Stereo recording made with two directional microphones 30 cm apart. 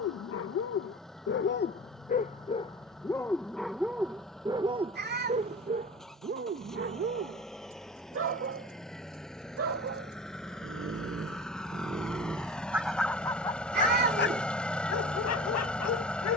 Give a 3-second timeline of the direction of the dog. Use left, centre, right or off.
left, centre, right, right, centre, left.